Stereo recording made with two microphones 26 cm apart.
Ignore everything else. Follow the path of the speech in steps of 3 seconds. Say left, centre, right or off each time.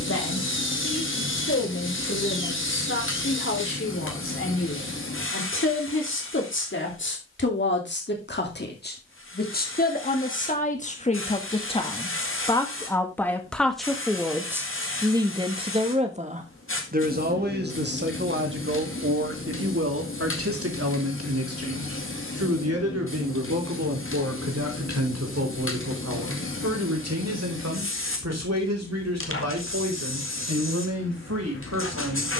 left, left, left, left, centre, right, right, right, right, right, right.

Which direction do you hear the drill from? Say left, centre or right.
left.